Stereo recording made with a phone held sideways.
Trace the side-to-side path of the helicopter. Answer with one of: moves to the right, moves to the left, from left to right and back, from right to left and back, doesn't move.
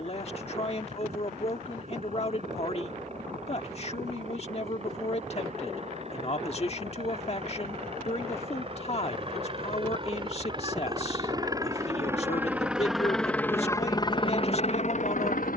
moves to the left.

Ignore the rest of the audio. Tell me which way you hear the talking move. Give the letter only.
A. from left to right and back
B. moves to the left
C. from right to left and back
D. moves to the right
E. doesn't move
E.